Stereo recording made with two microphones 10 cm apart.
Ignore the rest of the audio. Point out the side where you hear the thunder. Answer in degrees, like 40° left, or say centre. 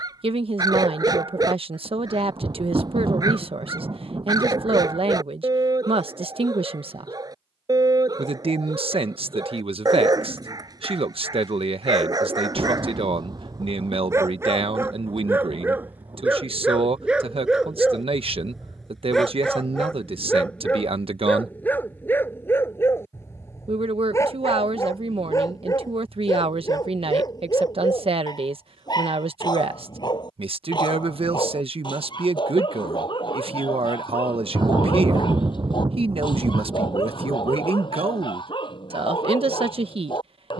40° right.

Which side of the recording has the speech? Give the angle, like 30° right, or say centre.
60° right.